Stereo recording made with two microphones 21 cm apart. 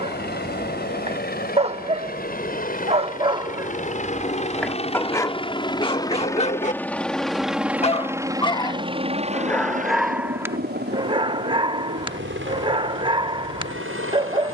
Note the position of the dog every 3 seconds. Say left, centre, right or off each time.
right, centre, left, centre, right.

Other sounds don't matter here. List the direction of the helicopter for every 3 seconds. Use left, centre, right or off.
left, left, centre, right, right.